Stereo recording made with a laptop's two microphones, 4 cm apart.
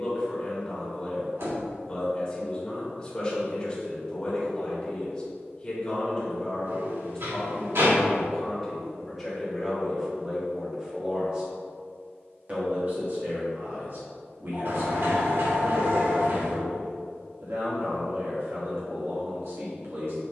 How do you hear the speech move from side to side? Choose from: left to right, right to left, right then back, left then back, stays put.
left to right.